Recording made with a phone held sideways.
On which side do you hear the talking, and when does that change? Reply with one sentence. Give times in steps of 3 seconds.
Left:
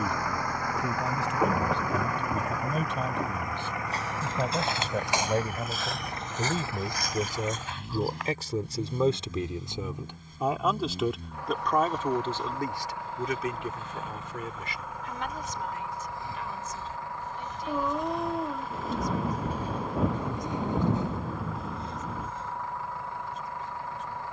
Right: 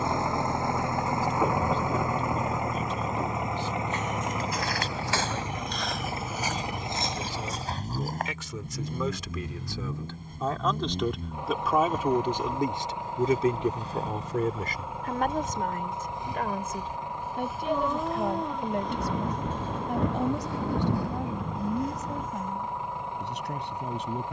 You can hear the talking on the left from 0 s, in the centre from 9 s and on the right from 12 s.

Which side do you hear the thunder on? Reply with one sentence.
You can hear the thunder in the centre.